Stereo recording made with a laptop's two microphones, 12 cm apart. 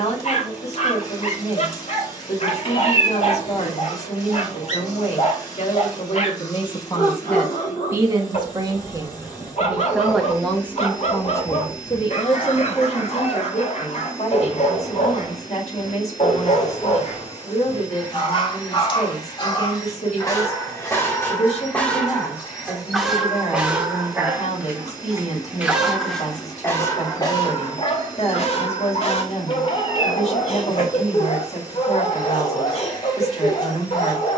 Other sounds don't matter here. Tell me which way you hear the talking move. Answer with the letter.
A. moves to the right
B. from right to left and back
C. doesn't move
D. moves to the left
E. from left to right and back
E.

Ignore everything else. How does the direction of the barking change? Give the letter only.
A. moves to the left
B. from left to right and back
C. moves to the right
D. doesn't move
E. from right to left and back
B.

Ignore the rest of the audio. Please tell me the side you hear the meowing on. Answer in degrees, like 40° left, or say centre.
40° left.